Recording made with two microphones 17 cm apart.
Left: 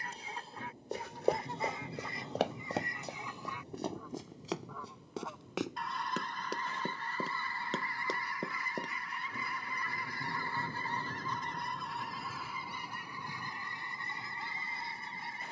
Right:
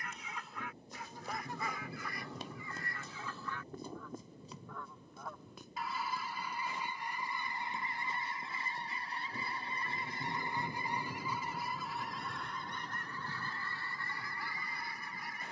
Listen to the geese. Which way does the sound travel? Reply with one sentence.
You can hear the geese move from left to right and back again.